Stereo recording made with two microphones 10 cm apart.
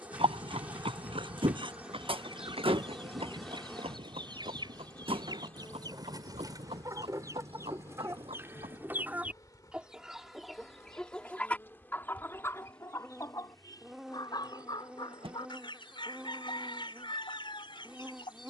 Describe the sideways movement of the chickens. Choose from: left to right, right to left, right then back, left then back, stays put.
right to left.